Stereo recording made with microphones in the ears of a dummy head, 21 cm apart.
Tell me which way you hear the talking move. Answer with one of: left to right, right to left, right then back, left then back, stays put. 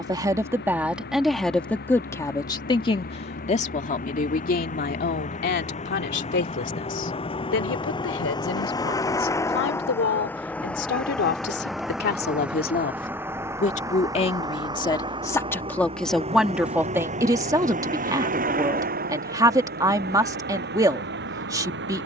left then back.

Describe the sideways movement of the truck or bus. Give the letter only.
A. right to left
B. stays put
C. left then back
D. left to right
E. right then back
D.